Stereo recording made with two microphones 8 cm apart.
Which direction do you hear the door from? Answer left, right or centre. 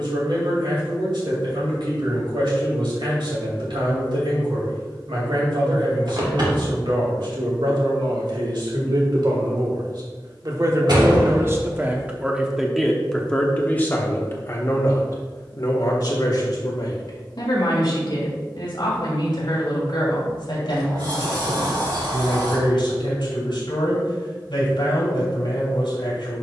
right.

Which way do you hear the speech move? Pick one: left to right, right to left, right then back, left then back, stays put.
right to left.